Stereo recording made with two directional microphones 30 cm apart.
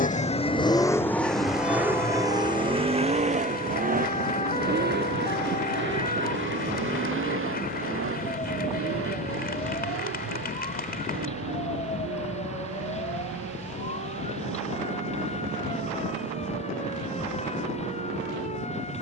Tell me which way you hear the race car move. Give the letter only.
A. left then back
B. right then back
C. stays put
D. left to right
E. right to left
D.